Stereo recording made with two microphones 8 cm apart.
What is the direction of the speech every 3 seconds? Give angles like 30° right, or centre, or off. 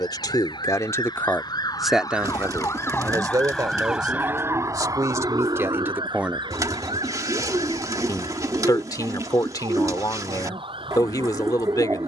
20° left, 40° right, 20° left, 50° left.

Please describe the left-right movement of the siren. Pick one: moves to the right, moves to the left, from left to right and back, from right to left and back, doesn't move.
moves to the right.